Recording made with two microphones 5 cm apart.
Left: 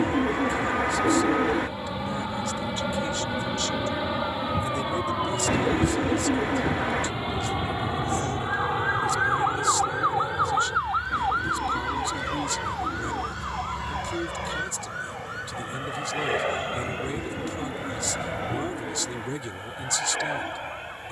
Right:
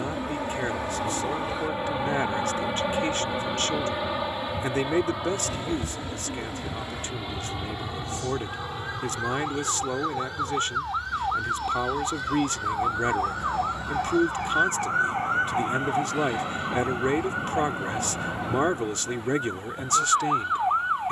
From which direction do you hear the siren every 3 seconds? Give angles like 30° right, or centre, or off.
70° left, 60° left, 50° left, 10° left, 20° right, 50° right, 60° right.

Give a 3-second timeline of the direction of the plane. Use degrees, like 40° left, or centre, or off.
20° right, centre, 20° left, 30° left, 40° left, 50° left, 50° left.